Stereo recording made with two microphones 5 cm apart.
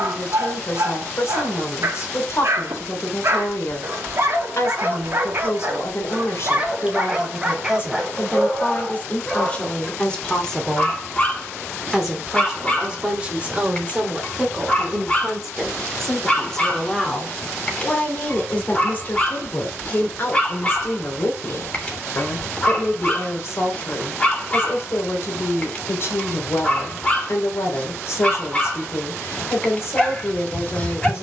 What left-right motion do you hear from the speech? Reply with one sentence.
You can hear the speech go right and come back.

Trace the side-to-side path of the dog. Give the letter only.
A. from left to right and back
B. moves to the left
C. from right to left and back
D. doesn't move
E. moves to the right
B.